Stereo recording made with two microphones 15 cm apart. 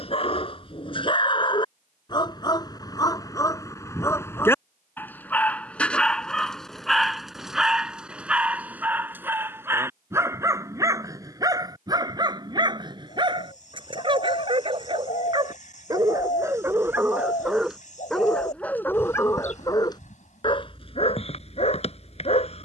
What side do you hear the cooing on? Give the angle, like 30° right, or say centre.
60° left.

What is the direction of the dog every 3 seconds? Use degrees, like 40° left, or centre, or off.
30° left, 20° left, centre, 20° right, 30° right, 20° right, 20° left, 40° left.